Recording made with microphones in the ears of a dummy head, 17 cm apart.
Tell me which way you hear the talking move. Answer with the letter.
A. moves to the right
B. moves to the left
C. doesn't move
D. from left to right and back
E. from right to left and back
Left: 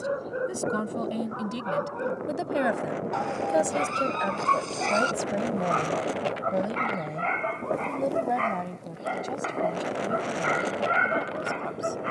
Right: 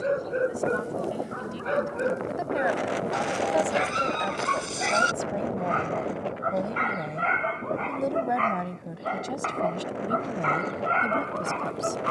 A.